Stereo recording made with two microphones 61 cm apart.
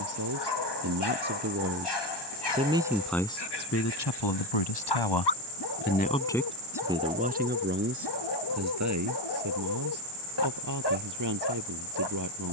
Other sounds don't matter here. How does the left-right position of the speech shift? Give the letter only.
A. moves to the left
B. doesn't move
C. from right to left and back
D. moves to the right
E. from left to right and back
C.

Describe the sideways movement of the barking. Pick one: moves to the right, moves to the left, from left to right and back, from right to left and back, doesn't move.
doesn't move.